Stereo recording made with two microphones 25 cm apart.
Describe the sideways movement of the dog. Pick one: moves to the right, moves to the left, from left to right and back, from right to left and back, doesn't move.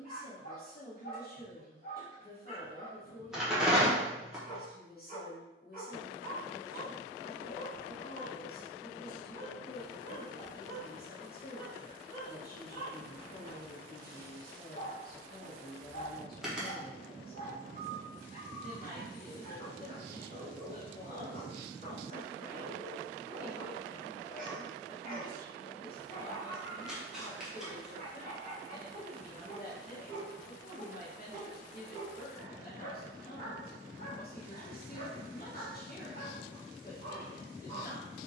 doesn't move.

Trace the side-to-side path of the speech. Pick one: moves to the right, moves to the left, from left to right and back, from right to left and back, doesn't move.
doesn't move.